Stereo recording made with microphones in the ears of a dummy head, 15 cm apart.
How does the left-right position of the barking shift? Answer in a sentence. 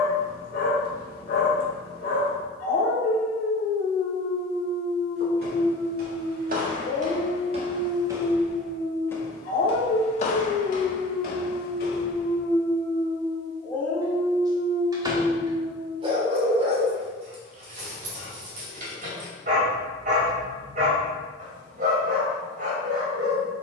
You can hear the barking travel towards the right.